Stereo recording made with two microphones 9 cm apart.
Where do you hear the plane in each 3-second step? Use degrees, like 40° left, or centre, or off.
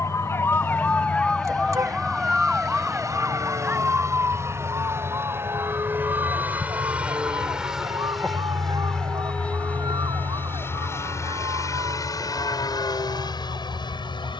50° right, 30° right, 10° right, 20° left, 50° left.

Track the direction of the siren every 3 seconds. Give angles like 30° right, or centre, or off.
10° left, 30° right, 40° right, 50° right, 50° right.